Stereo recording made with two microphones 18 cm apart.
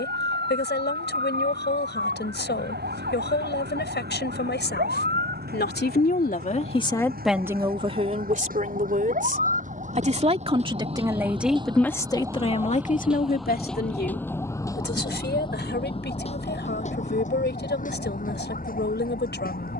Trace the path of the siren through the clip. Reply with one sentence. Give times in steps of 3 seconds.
You can hear the siren on the right from 0 s, in the centre from 12 s and on the left from 15 s.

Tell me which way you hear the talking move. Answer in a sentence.
You can hear the talking go right and come back.